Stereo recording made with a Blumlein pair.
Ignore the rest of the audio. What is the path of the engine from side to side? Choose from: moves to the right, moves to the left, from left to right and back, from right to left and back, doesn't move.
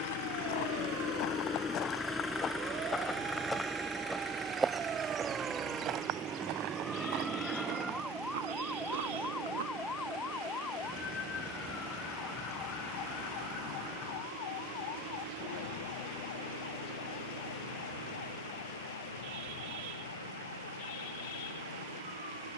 moves to the right.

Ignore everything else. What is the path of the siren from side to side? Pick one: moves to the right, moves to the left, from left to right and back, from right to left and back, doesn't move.
moves to the left.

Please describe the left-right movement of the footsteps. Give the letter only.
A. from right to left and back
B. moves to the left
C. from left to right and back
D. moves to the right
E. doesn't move
D.